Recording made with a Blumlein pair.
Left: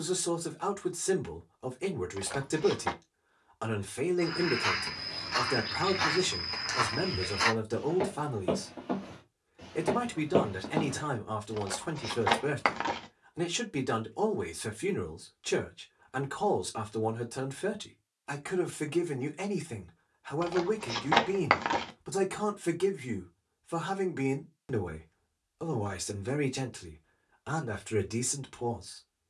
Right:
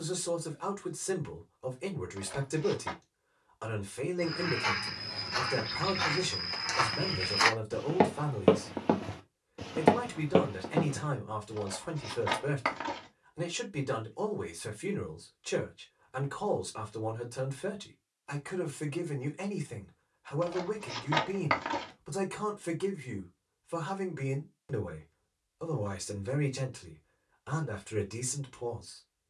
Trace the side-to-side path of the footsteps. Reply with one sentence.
In this clip you hear the footsteps go right and come back.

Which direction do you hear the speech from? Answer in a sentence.
In this clip you hear the speech on the left.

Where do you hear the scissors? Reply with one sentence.
You can hear the scissors on the left.